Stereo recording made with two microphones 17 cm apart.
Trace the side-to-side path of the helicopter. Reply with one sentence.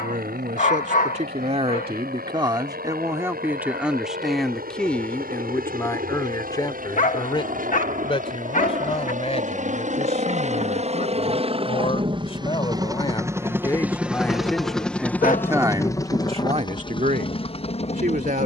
In this clip you hear the helicopter move to the left.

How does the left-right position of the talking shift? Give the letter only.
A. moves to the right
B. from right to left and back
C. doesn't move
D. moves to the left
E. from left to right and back
B.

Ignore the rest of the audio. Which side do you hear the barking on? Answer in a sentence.
You can hear the barking on the left.